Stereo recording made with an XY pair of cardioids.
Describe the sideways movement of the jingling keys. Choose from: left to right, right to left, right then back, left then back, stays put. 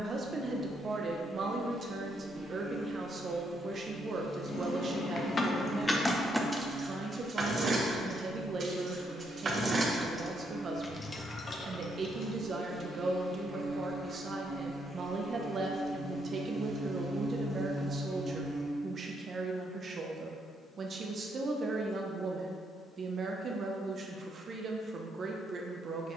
right then back.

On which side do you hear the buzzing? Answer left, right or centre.
right.